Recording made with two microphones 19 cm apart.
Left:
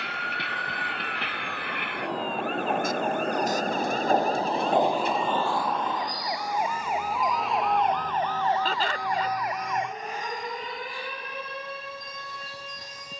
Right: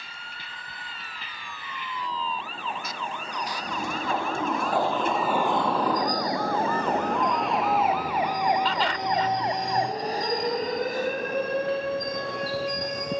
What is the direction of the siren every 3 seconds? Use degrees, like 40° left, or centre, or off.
50° left, 40° left, centre, 40° right, 50° right.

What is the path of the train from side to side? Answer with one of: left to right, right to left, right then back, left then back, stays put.
left to right.